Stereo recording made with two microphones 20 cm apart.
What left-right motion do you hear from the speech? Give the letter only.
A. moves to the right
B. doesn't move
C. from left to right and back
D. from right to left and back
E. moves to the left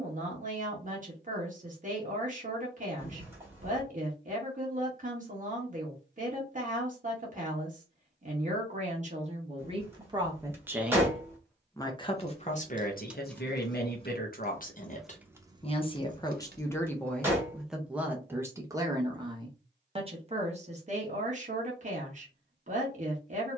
D.